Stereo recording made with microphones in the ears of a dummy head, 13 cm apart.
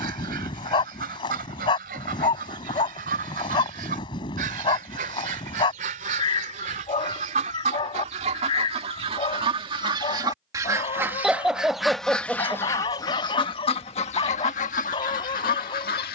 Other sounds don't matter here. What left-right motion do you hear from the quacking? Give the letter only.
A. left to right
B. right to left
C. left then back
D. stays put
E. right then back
B.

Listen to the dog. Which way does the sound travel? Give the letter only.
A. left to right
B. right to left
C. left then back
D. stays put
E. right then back
D.